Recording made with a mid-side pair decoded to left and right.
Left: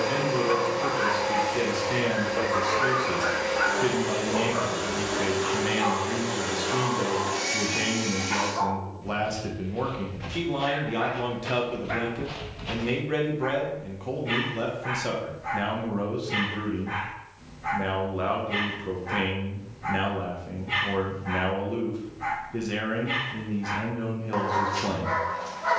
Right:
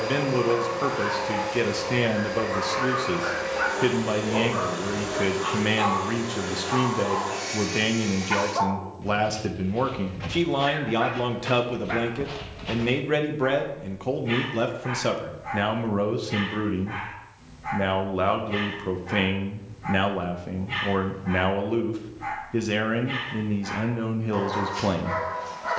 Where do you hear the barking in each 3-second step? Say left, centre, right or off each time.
left, centre, right, right, centre, left, left, left, left.